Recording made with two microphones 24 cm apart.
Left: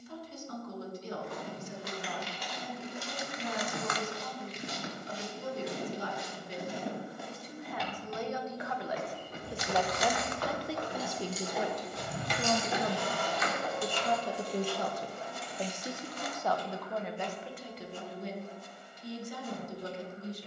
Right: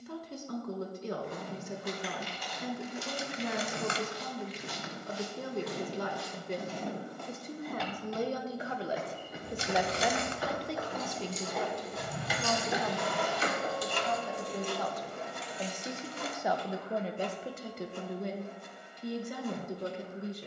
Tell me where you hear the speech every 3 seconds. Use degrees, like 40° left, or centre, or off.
60° right, 60° right, 40° right, centre, 30° left, 20° right, 60° right.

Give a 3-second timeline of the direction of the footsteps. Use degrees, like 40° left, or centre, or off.
70° left, 40° left, 10° left, 10° right, 50° left, off, off.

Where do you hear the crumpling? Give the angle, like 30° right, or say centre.
30° right.